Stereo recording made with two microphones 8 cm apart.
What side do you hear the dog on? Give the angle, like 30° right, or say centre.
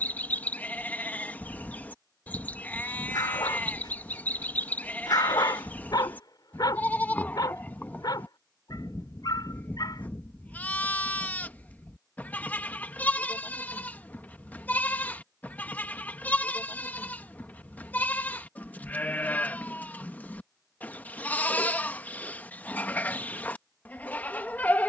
60° left.